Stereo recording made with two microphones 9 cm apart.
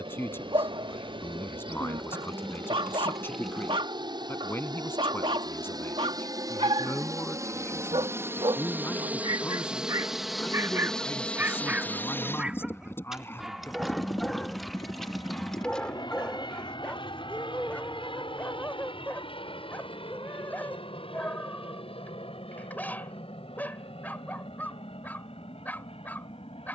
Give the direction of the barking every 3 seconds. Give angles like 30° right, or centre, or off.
70° right, 70° right, 70° right, 30° right, centre, 10° left, 20° left, 20° left, 20° left.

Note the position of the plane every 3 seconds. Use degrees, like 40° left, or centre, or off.
70° right, 60° right, 30° right, centre, 30° left, 50° left, 60° left, 70° left, 70° left.